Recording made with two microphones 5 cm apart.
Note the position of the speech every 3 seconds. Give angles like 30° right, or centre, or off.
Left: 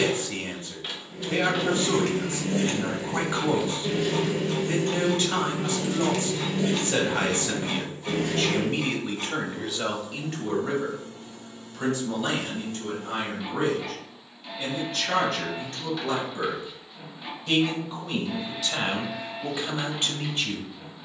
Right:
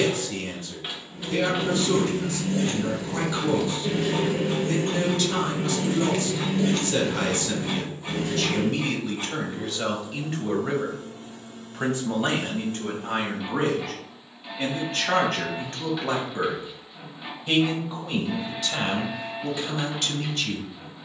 30° left, 30° left, 30° left, centre, 40° right, 30° right, 10° left.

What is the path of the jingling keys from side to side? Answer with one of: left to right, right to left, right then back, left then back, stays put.
right then back.